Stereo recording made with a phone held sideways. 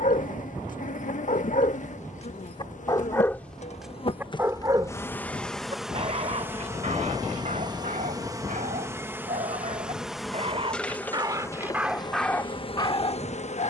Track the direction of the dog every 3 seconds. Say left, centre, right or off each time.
left, centre, right, right, left.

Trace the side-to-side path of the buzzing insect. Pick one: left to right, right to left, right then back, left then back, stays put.
right then back.